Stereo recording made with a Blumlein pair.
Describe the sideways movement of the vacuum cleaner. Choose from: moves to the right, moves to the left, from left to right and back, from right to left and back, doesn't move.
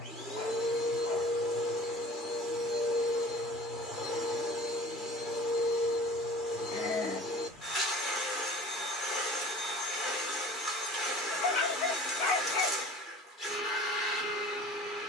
doesn't move.